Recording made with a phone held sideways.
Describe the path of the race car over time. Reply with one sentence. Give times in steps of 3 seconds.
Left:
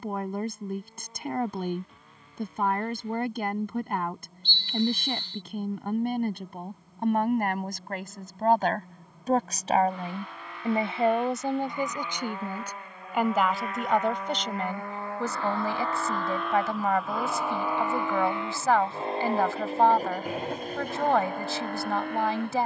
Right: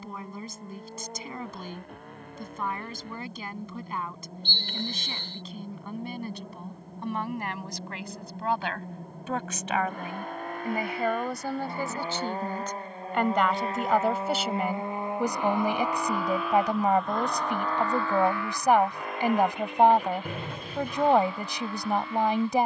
In this clip you hear the race car on the right from 0 s, in the centre from 15 s and on the left from 18 s.